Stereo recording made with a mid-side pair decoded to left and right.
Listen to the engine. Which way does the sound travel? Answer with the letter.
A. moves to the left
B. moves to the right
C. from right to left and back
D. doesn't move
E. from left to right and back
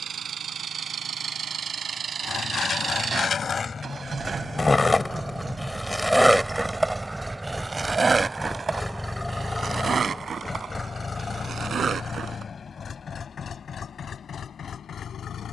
A.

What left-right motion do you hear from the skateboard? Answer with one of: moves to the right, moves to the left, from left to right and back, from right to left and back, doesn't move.
moves to the right.